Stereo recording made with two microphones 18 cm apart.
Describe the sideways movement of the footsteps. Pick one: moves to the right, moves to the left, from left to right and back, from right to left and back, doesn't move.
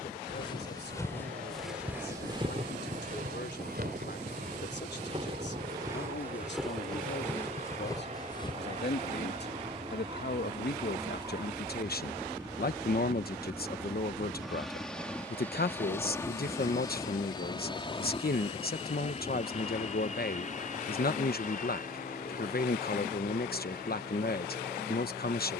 from left to right and back.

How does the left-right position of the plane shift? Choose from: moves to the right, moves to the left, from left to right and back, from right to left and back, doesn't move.
moves to the left.